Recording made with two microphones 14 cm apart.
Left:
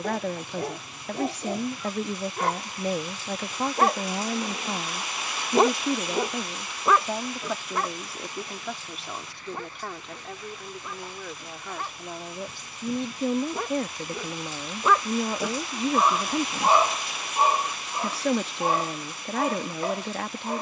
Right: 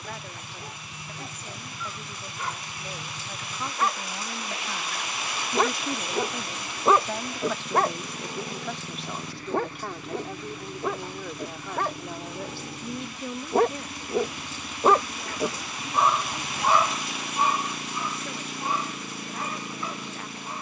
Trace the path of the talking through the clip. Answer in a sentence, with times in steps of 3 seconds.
You can hear the talking on the left from 0 s, in the centre from 6 s and on the left from 12 s.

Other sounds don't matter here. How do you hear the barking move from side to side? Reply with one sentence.
In this clip you hear the barking go right and come back.